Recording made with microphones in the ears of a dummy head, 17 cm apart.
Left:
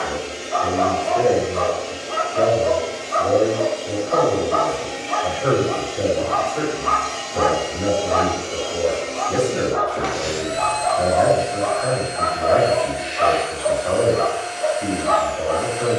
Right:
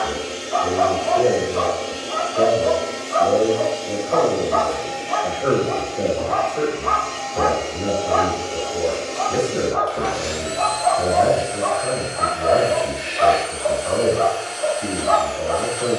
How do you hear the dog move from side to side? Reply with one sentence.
In this clip you hear the dog move to the right.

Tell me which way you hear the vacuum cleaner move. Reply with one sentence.
You can hear the vacuum cleaner go left and come back.